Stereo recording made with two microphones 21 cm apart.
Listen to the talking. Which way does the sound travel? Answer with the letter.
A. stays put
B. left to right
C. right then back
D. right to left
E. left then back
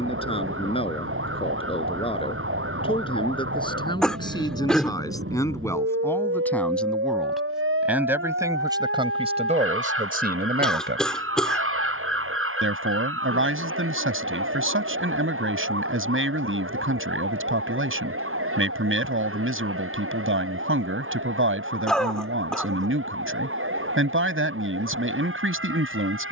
B.